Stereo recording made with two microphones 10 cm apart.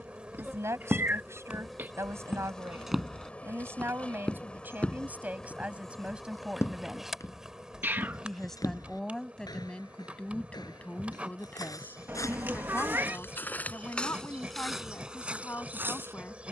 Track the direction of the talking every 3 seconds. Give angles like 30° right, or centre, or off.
30° right, 20° right, centre, 10° left, 20° left, 20° left.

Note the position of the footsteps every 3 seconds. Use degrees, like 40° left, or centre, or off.
20° right, 10° left, 30° left, 40° left, 20° left, 20° right.